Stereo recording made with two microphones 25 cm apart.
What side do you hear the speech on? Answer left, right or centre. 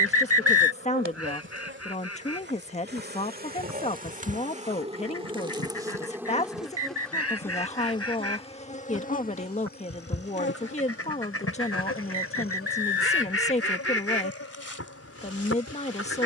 left.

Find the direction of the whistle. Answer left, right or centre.
right.